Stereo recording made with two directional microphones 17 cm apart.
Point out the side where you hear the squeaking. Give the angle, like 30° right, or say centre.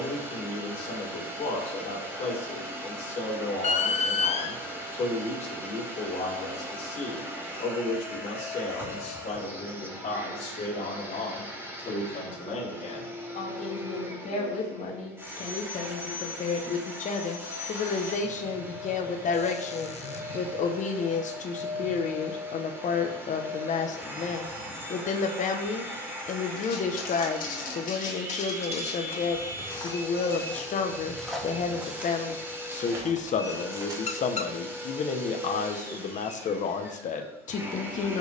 40° left.